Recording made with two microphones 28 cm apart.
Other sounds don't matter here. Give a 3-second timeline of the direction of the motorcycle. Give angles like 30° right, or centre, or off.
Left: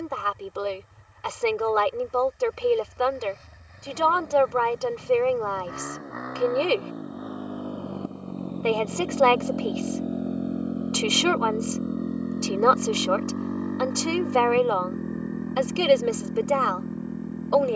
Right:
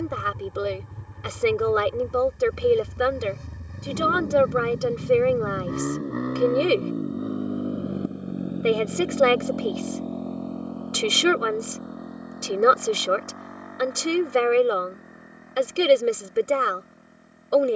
60° right, 50° right, 20° right, 10° left, 40° left, 60° left.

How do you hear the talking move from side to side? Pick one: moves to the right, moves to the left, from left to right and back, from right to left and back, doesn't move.
doesn't move.